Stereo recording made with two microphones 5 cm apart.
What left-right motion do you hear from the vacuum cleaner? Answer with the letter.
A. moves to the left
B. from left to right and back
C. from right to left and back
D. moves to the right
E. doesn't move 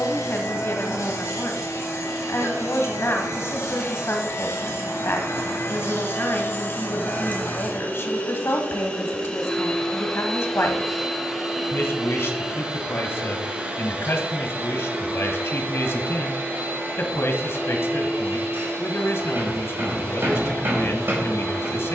D.